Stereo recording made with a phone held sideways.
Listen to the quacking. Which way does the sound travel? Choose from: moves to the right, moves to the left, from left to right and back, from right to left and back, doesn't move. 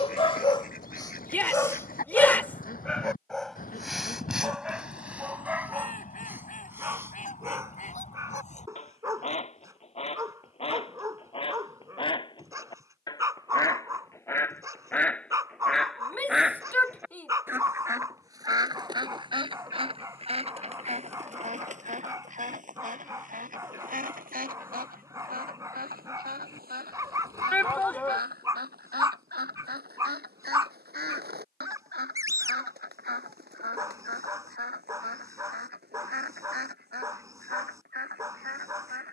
moves to the right.